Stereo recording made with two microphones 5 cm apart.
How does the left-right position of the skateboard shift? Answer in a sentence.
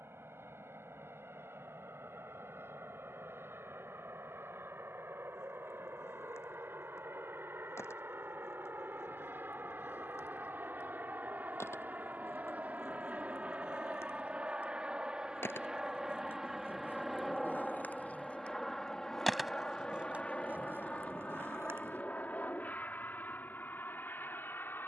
In this clip you hear the skateboard go from the left side to the right.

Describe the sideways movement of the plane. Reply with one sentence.
You can hear the plane go from the right side to the left.